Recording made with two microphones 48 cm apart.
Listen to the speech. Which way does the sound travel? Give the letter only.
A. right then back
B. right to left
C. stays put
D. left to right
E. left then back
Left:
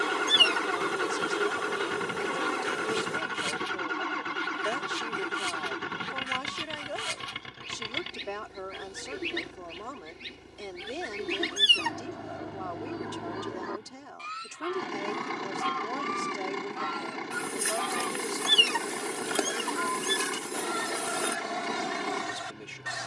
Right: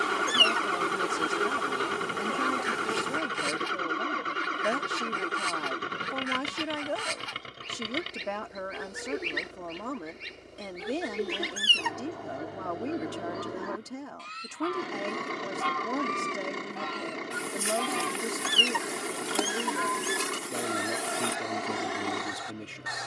C.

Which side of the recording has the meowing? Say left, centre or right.
left.